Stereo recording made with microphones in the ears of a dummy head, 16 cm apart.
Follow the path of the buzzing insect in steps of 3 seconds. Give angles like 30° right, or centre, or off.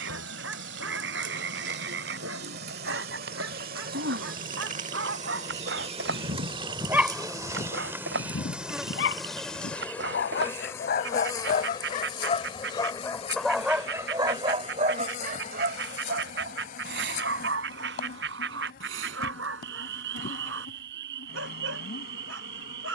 60° right, 40° right, 20° right, 10° left, 30° left, 40° left, 50° left, 60° left.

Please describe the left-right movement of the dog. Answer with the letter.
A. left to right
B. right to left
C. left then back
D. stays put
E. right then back
C.